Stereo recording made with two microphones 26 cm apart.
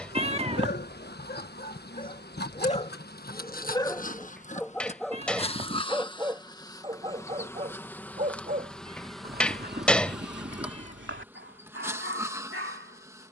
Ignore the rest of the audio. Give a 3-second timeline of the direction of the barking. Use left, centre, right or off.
left, centre, right, right, right.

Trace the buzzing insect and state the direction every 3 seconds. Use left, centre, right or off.
left, left, centre, centre, centre.